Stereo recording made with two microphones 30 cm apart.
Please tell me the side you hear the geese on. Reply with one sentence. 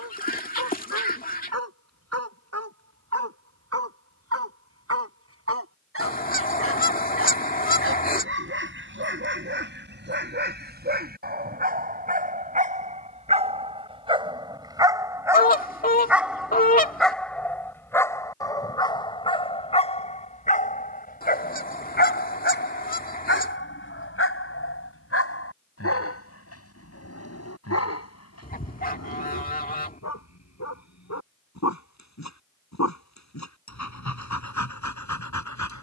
You can hear the geese on the left.